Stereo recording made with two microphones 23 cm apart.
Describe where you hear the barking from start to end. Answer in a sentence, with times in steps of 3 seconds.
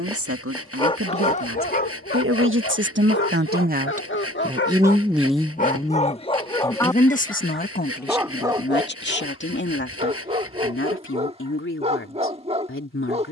In this clip you hear the barking on the left from 0 s, in the centre from 6 s and on the right from 9 s.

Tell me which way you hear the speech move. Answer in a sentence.
In this clip you hear the speech move to the left.